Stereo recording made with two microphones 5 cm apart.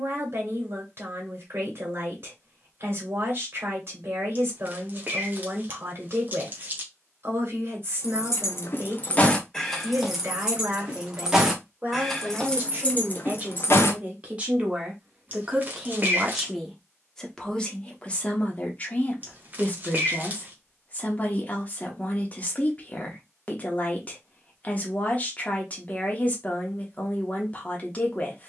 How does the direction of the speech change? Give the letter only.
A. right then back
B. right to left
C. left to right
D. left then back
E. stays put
B.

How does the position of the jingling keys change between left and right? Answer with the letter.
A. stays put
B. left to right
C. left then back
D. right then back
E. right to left
D.